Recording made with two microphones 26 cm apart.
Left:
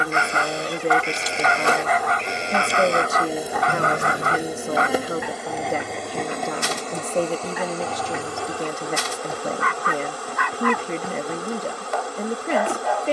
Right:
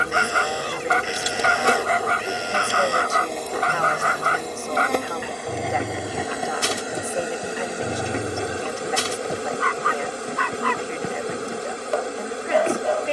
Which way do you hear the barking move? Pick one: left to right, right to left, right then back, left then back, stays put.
stays put.